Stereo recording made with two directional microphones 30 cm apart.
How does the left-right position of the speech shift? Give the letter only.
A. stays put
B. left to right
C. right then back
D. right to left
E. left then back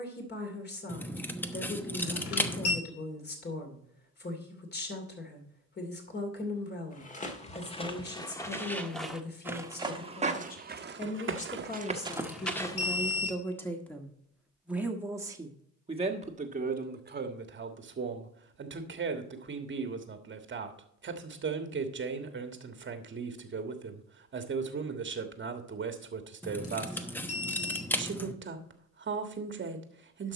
B.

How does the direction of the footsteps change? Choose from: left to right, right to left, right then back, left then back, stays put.
right then back.